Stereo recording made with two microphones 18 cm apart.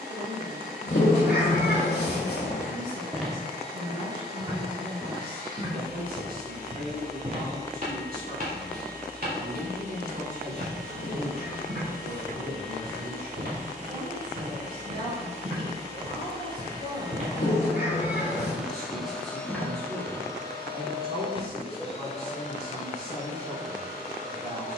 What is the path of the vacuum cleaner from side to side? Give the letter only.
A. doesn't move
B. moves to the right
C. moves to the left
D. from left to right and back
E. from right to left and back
C.